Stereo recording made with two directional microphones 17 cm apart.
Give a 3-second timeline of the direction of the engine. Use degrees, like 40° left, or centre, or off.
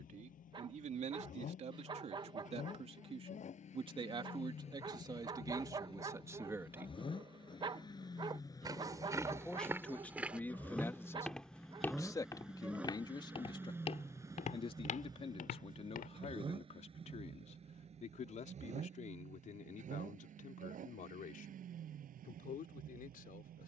50° left, 40° left, 30° left, 10° left, 10° right, 30° right, 40° right, 50° right.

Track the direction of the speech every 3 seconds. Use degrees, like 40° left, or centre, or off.
40° right, 30° right, 10° right, 10° left, 30° left, 40° left, 50° left, 50° left.